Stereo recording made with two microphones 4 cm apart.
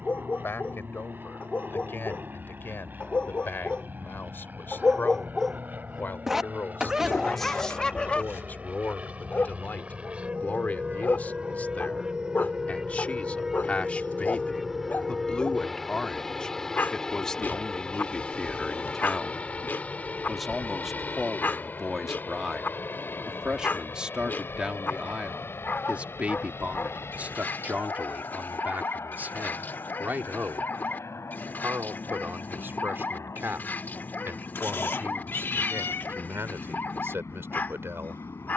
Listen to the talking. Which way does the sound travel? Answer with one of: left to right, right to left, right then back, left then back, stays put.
left to right.